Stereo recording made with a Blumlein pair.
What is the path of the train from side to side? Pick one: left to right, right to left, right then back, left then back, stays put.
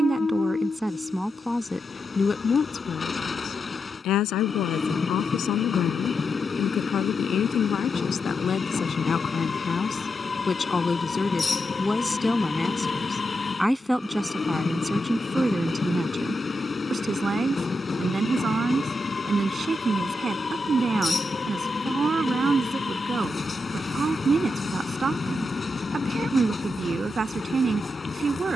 stays put.